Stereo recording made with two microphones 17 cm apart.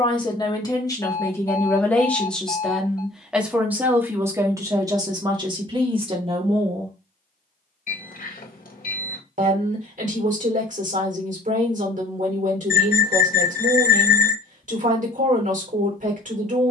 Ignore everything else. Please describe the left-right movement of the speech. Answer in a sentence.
In this clip you hear the speech move from left to right.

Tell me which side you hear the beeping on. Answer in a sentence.
You can hear the beeping on the left.